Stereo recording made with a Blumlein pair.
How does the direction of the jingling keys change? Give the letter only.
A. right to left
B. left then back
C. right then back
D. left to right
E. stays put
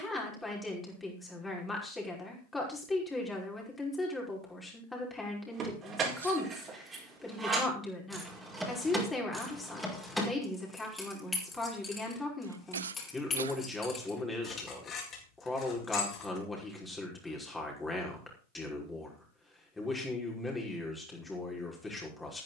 A.